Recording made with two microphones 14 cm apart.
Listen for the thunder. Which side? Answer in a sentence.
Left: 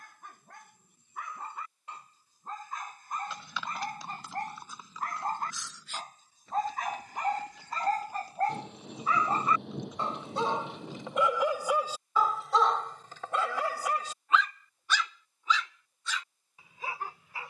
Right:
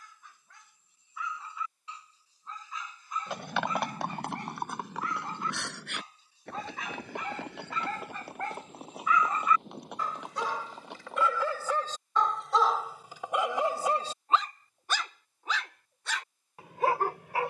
You can hear the thunder on the left.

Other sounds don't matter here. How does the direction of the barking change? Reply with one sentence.
In this clip you hear the barking go from the left side to the right.